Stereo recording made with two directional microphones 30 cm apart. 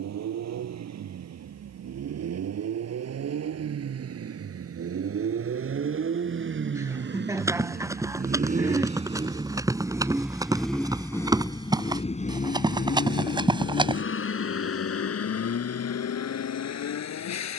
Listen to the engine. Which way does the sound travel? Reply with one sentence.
In this clip you hear the engine move to the left.